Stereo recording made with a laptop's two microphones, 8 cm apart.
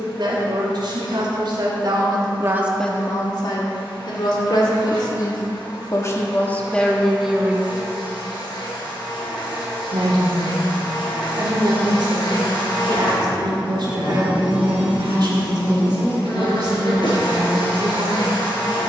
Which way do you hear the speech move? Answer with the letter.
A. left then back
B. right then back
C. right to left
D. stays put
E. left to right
A.